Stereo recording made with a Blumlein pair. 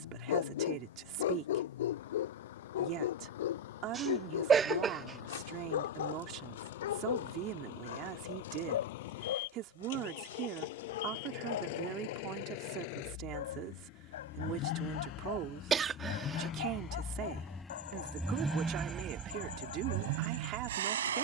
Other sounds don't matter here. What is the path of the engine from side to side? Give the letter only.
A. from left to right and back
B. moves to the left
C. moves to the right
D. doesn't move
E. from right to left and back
C.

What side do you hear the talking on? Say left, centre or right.
right.